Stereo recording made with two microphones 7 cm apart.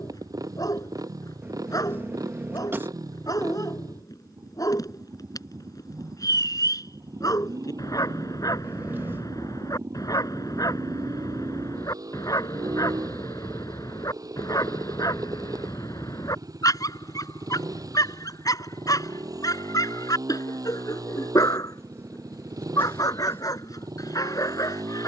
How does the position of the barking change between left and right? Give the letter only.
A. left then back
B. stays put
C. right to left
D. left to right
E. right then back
B.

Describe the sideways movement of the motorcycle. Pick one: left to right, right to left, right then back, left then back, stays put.
stays put.